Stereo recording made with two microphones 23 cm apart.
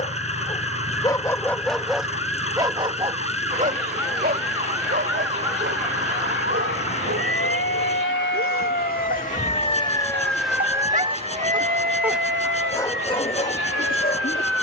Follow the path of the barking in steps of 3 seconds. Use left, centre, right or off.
centre, right, right, right, left.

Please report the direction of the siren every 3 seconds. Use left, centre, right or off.
left, left, left, centre, right.